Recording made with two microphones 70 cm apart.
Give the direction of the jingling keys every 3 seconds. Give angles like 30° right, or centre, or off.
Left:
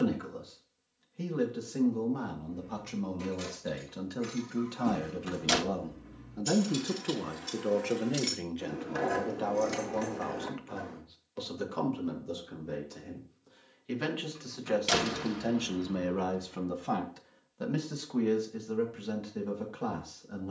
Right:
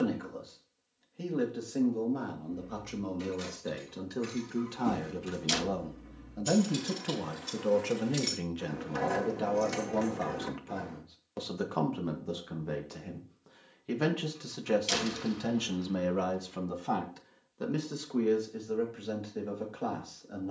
30° left, 20° left, 10° right, 40° right, off, off, off.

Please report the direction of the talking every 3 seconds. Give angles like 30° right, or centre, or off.
30° left, 10° left, 30° right, 60° right, 70° right, 10° right, 30° left.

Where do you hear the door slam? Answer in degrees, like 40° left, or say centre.
80° left.